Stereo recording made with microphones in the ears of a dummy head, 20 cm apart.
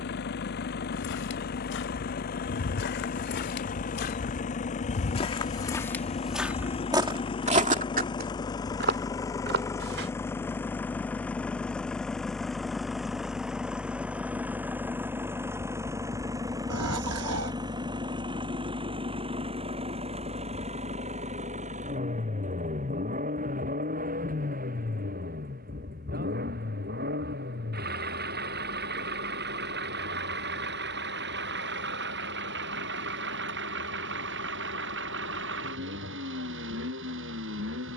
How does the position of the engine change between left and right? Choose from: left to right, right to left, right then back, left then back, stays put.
left to right.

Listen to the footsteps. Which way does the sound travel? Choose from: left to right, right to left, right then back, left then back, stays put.
left to right.